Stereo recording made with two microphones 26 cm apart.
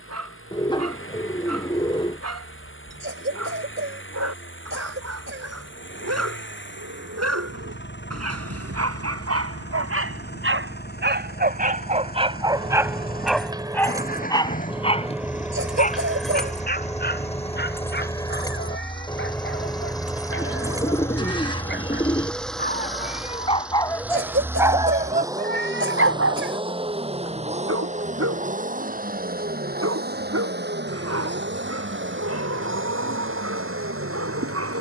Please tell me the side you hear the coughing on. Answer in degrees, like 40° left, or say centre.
50° right.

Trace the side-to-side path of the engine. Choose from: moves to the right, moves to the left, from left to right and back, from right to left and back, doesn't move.
moves to the right.